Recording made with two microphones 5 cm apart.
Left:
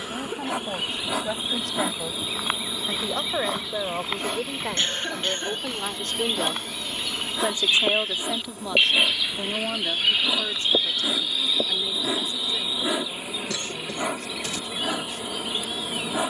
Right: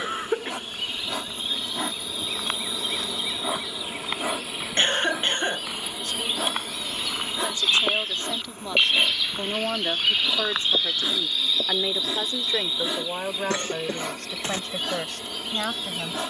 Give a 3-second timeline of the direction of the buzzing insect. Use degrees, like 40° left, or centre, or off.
10° left, 10° right, centre, 20° left, 20° left, 20° left.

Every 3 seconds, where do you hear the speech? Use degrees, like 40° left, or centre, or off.
70° left, 60° left, 20° left, 30° right, 60° right, 60° right.